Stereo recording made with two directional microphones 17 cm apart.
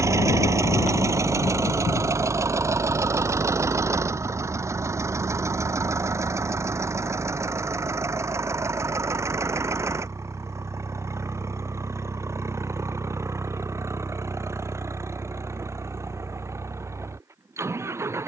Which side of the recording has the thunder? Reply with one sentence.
In this clip you hear the thunder on the left.